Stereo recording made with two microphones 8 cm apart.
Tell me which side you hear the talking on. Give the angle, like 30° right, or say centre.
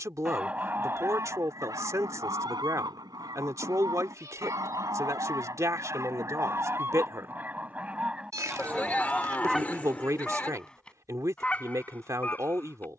40° right.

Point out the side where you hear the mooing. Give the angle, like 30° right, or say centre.
20° left.